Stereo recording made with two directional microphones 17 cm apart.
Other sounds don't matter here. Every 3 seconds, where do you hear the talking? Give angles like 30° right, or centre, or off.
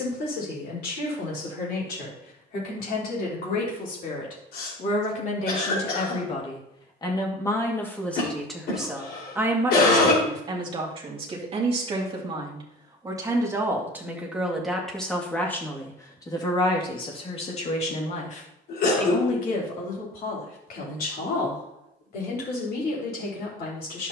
70° left, 50° left, 20° left, 30° right, 10° right, 20° left, 50° left, 70° left.